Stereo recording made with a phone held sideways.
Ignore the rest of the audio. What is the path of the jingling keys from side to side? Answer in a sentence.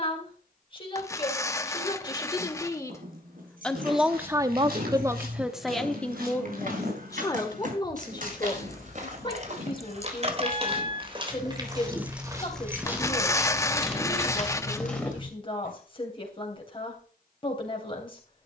In this clip you hear the jingling keys move to the left.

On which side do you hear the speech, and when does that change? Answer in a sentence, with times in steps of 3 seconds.
You can hear the speech on the left from 0 s, in the centre from 3 s and on the left from 6 s.